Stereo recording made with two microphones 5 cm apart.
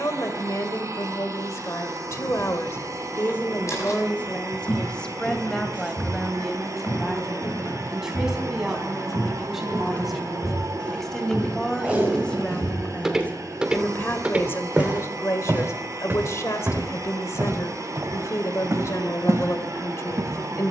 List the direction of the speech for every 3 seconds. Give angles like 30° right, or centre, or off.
70° left, 20° left, centre, centre, 30° left, 60° left, 70° left.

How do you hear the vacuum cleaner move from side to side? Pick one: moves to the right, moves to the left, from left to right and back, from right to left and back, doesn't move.
doesn't move.